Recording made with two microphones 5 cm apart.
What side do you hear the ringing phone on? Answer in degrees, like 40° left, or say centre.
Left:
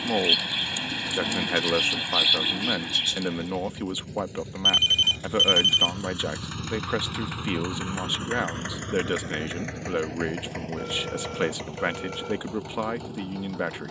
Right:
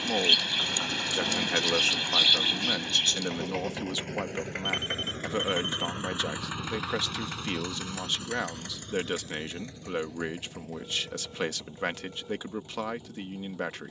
80° left.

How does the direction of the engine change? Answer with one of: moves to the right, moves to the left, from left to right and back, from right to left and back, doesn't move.
moves to the left.